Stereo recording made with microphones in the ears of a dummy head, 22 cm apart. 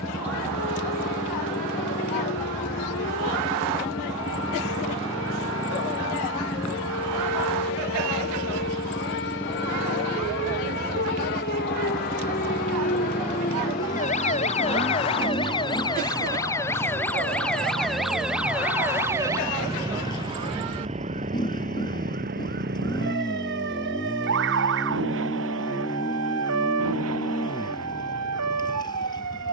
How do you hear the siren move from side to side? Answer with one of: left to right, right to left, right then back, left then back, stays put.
left to right.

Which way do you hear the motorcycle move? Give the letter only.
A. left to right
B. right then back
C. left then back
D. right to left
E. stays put
E.